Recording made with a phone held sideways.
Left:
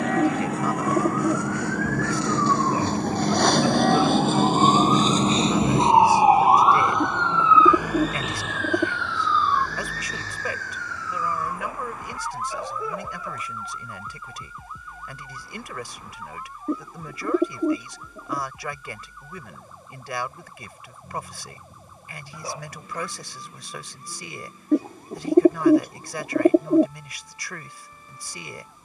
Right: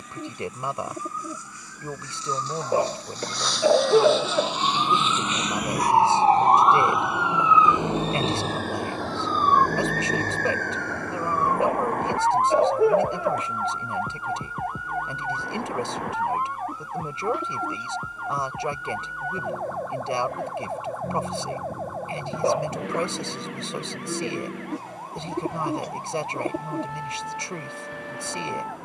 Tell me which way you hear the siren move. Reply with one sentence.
In this clip you hear the siren go from the left side to the right.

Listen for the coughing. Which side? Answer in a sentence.
In this clip you hear the coughing on the right.